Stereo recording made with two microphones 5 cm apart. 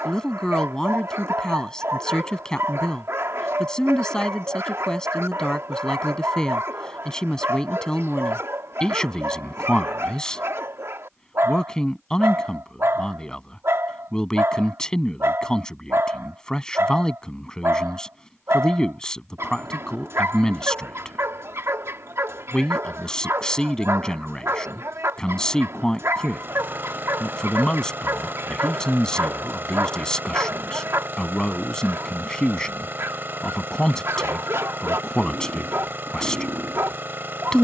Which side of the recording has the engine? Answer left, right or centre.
right.